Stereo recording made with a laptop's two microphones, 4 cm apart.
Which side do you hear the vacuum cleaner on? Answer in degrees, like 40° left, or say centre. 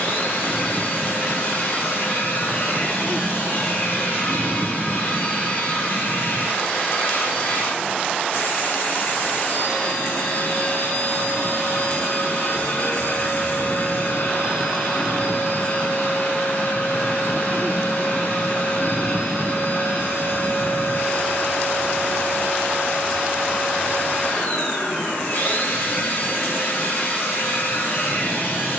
50° left.